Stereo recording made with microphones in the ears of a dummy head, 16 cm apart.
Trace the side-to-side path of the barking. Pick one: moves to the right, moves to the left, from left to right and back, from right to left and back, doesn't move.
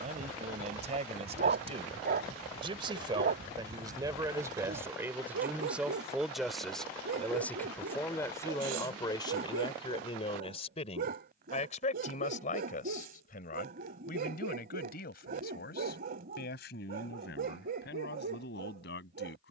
doesn't move.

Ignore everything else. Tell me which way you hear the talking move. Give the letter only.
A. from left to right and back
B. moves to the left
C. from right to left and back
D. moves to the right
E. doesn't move
B.